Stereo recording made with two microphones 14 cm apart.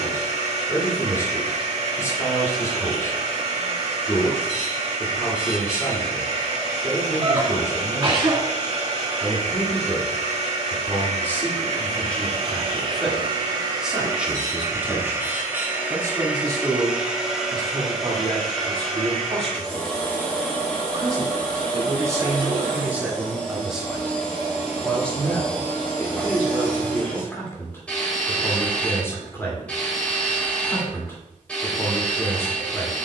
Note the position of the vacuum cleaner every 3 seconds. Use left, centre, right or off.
right, right, right, right, right, centre, centre, centre, centre, centre, centre.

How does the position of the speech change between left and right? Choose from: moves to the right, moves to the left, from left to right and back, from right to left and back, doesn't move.
from left to right and back.